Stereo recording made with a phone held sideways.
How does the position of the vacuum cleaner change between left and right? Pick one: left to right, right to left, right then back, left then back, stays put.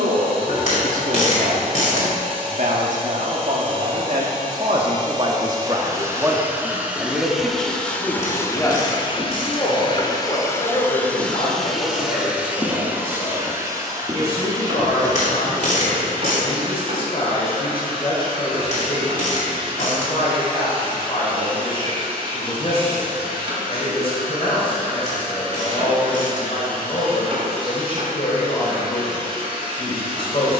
left then back.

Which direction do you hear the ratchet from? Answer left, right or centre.
left.